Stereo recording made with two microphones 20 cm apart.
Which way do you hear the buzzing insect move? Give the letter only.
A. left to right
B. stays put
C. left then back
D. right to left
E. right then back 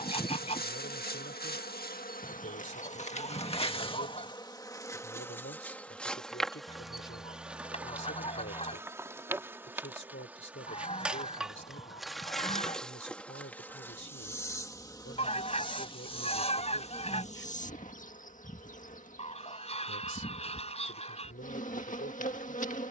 E.